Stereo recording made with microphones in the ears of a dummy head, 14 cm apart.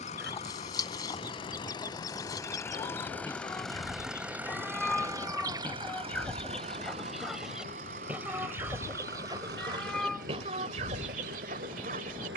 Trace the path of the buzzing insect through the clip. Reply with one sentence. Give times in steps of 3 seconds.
In this clip you hear the buzzing insect on the left from 0 s, in the centre from 3 s and on the right from 6 s.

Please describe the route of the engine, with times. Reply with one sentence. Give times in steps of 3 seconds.
In this clip you hear the engine on the left from 0 s, in the centre from 3 s and on the right from 6 s.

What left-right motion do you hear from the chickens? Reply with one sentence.
In this clip you hear the chickens move from left to right.